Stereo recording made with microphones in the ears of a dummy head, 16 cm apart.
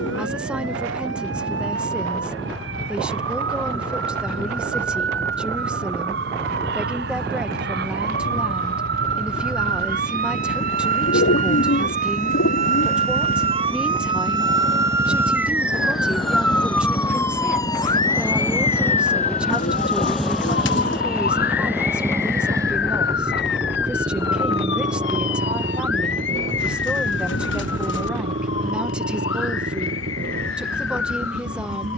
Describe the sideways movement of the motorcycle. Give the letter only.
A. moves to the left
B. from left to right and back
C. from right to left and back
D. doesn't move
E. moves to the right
E.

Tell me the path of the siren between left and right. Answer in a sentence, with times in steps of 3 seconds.
You can hear the siren on the right from 0 s, in the centre from 15 s and on the left from 18 s.